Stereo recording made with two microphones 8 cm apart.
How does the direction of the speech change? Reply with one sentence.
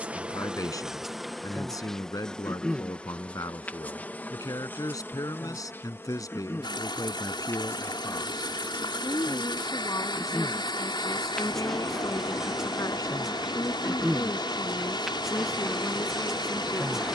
You can hear the speech stay in one place.